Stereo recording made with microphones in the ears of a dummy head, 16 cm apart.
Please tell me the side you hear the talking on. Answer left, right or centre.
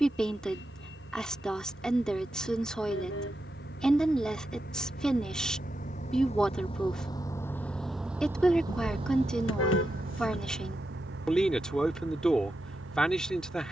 centre.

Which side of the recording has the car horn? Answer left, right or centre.
left.